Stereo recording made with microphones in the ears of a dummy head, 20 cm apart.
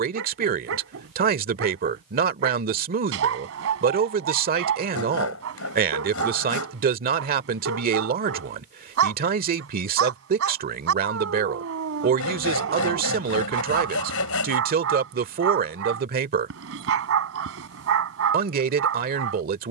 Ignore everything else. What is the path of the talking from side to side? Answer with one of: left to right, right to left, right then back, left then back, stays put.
stays put.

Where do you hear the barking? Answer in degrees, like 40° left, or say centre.
70° right.